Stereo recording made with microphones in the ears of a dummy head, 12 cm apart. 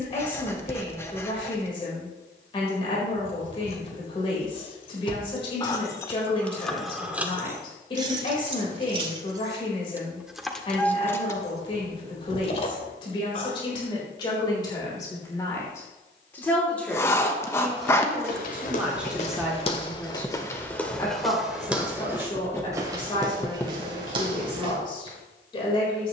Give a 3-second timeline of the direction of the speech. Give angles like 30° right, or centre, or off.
40° left, 40° left, 40° left, 40° left, 30° left, 10° left, centre, 30° left, 40° left.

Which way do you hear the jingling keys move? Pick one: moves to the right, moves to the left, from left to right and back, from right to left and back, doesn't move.
from left to right and back.